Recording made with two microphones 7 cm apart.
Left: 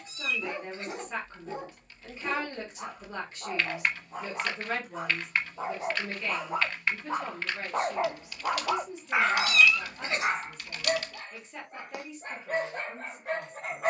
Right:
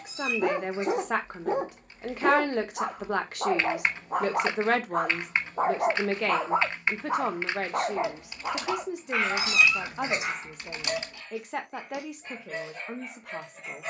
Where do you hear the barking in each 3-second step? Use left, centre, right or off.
right, right, centre, left, left.